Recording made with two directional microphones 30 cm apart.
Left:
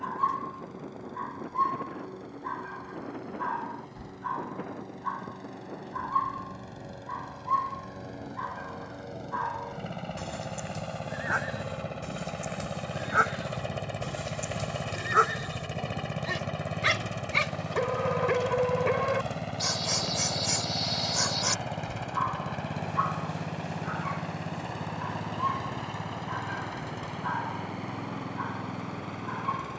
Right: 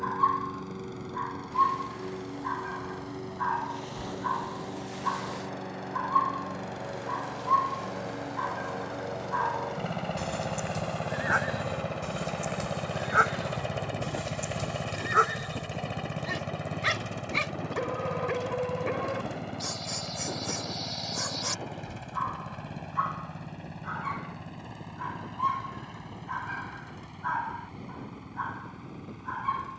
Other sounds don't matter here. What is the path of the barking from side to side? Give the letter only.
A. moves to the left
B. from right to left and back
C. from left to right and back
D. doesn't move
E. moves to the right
B.